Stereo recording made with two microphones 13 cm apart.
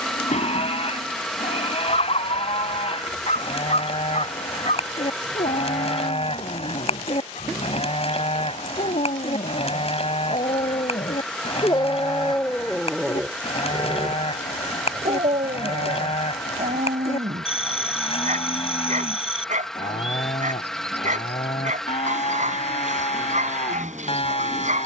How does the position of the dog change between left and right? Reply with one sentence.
You can hear the dog move to the right.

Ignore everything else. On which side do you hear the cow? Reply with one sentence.
You can hear the cow on the left.